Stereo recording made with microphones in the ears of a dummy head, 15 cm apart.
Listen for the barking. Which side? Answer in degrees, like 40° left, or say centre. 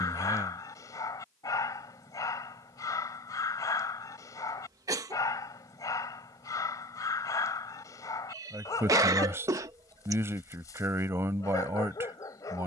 20° left.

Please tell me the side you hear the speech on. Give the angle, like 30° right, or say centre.
20° right.